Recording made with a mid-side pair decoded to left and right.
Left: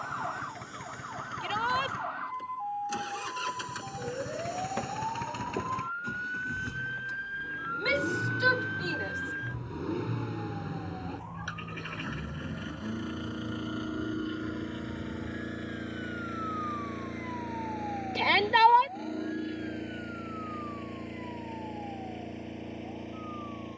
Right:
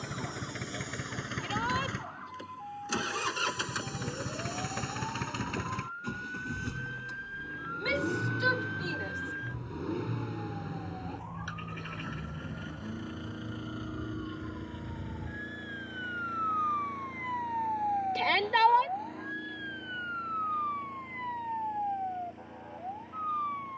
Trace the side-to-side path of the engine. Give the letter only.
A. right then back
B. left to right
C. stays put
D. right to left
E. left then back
D.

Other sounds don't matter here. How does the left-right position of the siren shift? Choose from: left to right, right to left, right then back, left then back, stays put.
left to right.